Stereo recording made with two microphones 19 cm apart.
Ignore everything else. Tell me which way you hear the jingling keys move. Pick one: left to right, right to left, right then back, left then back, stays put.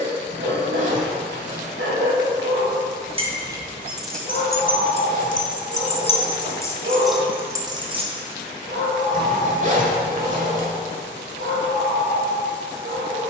left then back.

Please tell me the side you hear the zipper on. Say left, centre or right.
right.